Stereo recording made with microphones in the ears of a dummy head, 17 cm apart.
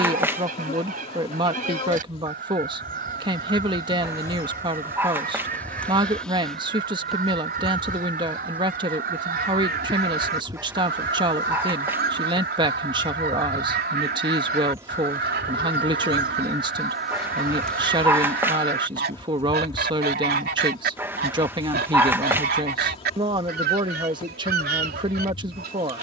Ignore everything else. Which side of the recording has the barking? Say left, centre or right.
centre.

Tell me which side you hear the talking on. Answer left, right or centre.
right.